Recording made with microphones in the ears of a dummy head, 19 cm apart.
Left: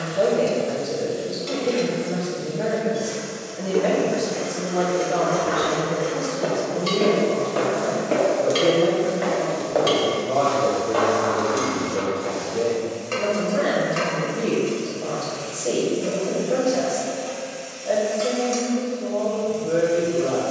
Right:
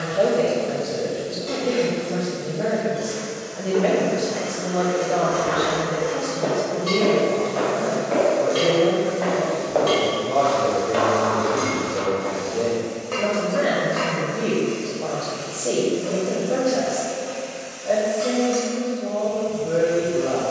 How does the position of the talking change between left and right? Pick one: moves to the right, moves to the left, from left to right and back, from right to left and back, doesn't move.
doesn't move.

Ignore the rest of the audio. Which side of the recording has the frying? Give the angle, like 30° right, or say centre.
30° left.